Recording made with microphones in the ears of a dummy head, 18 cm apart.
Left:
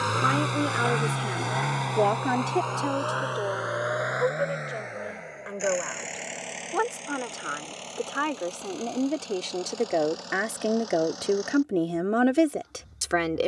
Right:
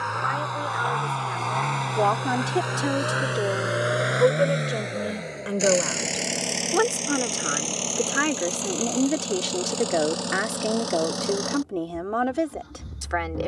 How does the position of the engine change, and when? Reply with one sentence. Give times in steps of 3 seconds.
You can hear the engine in the centre from 0 s and on the right from 3 s.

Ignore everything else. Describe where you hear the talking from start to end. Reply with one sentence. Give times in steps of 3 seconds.
In this clip you hear the talking on the left from 0 s, on the right from 3 s, in the centre from 9 s and on the left from 12 s.